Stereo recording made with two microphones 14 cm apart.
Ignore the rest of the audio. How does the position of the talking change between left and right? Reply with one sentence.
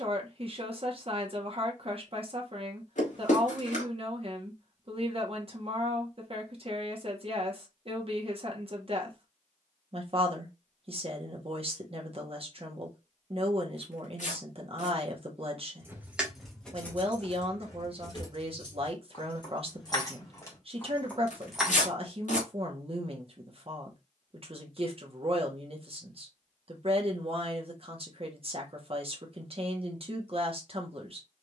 You can hear the talking stay in one place.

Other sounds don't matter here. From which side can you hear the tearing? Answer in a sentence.
You can hear the tearing on the left.